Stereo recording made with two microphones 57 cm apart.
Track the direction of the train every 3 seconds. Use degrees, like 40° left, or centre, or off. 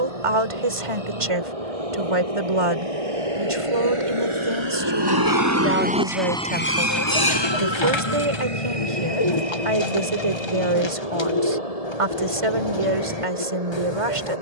70° right, 50° right, 40° left, 70° left, 80° left.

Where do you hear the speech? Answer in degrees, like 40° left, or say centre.
60° right.